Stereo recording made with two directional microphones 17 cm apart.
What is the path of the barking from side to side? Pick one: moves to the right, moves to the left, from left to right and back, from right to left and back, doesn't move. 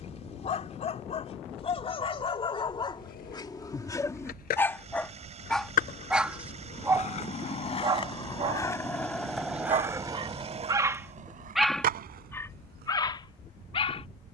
from left to right and back.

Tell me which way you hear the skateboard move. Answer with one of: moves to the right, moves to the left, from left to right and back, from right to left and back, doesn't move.
moves to the right.